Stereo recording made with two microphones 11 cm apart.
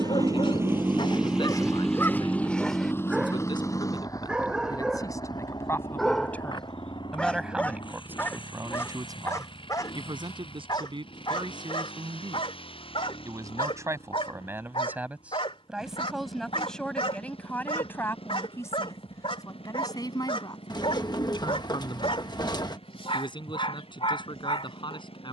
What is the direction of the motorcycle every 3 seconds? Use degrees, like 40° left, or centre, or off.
10° right, 30° left, 50° left, 50° left, 60° left, 60° left, 60° left, 60° left, 60° left.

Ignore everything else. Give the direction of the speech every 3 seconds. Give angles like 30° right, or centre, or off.
50° left, 40° left, 10° right, 50° right, 30° right, centre, 30° left, 50° left, 50° left.